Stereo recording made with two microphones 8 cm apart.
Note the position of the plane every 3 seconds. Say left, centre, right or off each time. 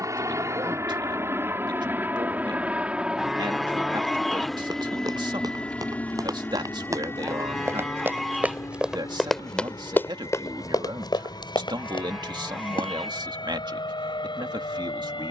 right, centre, left, left, left.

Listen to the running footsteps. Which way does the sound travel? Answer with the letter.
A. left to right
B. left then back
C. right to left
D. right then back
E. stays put
C.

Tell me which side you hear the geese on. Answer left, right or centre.
centre.